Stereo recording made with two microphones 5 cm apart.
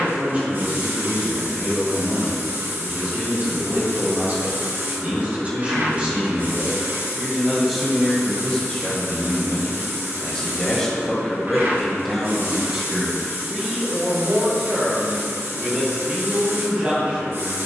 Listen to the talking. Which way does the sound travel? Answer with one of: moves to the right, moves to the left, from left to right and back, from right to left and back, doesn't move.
from right to left and back.